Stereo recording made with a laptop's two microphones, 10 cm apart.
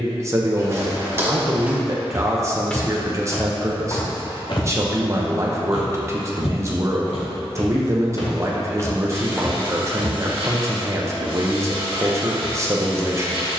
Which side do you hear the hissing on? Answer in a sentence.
You can hear the hissing on the right.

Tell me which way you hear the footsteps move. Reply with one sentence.
In this clip you hear the footsteps move from right to left and back again.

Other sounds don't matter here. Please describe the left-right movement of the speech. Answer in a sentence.
You can hear the speech stay put.